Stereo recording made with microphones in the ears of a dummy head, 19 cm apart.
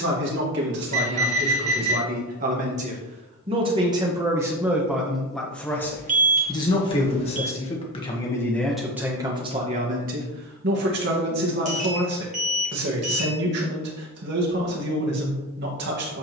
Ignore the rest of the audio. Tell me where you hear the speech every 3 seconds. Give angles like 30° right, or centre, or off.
50° right, 10° right, 20° left, 40° right, 50° right, 50° right.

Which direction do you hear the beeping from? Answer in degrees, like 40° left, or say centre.
30° right.